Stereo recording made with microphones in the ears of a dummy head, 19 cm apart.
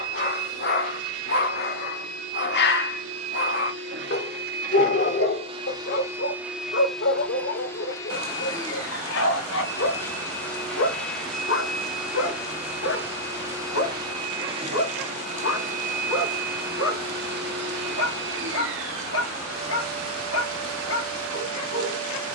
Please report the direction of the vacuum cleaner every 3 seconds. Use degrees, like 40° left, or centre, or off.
80° right, 40° right, 10° left, centre, 20° right, 40° right, 70° right, 70° right.